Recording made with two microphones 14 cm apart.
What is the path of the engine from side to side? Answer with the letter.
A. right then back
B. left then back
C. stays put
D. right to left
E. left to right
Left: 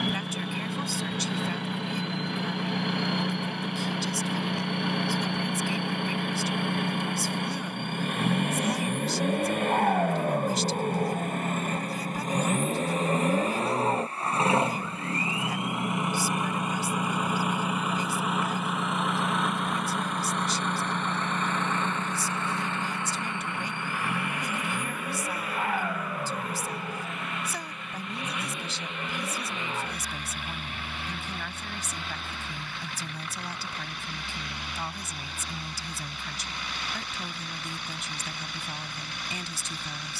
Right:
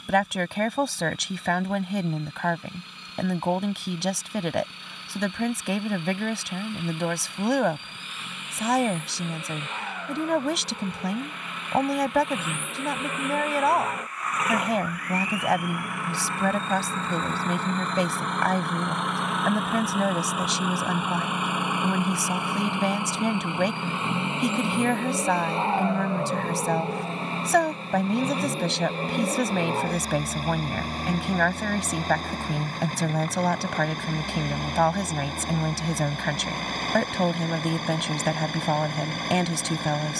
E.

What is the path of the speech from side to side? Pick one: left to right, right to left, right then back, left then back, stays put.
stays put.